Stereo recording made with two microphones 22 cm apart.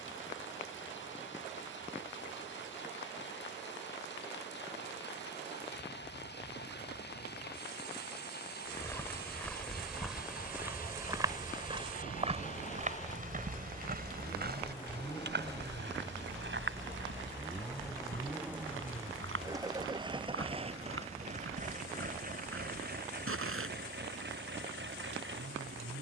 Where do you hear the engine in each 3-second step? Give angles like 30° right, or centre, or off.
60° left, 60° left, 50° left, 40° left, 30° left, 10° left, 20° right, 40° right, 60° right.